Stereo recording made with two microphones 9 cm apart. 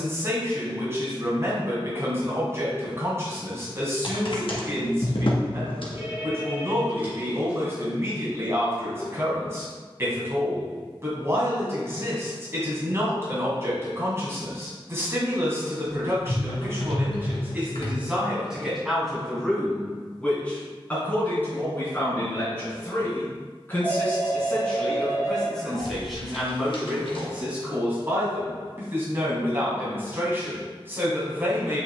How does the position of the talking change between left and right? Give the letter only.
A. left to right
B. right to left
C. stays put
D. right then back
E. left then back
E.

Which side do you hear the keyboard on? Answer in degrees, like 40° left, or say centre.
60° left.